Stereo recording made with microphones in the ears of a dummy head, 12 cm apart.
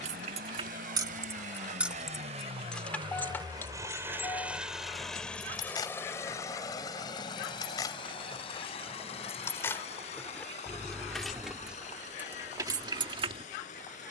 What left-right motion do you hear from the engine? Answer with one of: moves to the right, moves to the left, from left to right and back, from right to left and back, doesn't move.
moves to the left.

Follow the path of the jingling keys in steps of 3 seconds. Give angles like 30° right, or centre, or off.
20° right, 20° left, 30° left, 10° left, 30° right.